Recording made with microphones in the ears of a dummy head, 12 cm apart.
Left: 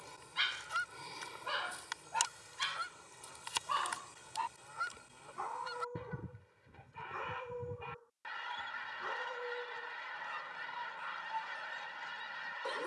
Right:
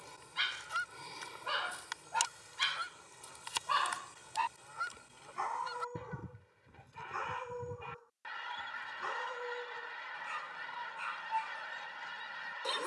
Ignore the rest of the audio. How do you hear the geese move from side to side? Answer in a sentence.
In this clip you hear the geese stay in one place.